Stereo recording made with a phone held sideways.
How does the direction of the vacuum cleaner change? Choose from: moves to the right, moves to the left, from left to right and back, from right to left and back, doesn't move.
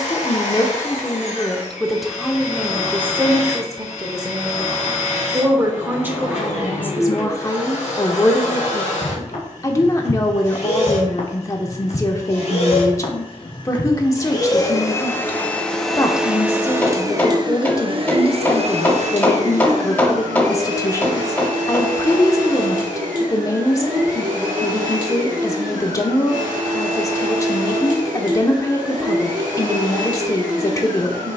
moves to the right.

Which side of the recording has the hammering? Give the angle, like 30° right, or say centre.
10° left.